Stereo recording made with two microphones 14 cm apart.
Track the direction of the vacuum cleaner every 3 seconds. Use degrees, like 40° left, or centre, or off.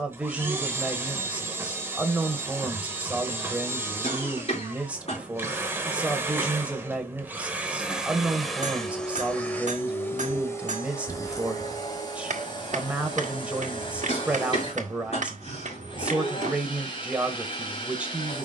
20° right, 20° right, 10° right, 20° left, 30° left, 40° left.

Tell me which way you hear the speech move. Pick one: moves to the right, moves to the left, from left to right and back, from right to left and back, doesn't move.
doesn't move.